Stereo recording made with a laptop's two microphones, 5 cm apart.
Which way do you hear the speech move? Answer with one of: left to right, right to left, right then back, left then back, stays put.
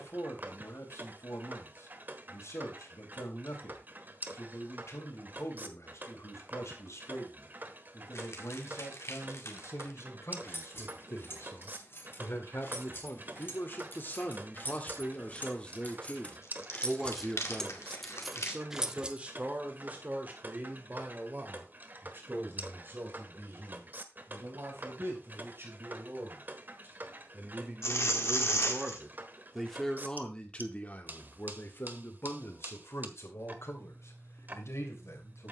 right then back.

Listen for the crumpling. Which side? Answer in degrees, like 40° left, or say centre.
70° left.